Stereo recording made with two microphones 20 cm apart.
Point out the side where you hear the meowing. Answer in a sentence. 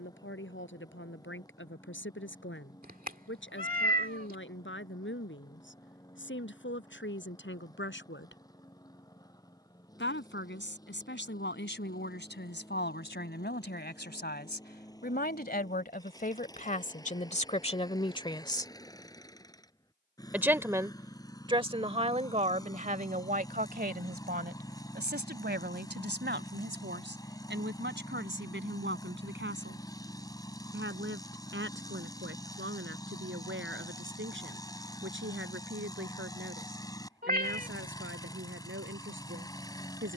In this clip you hear the meowing on the right.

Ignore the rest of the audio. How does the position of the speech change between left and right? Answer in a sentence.
You can hear the speech travel towards the right.